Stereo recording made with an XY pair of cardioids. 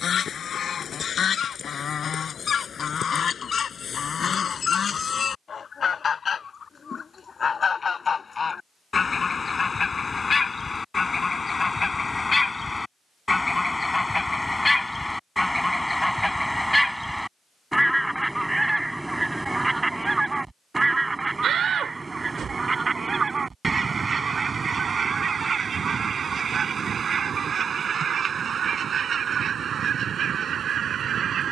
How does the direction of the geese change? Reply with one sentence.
You can hear the geese move to the right.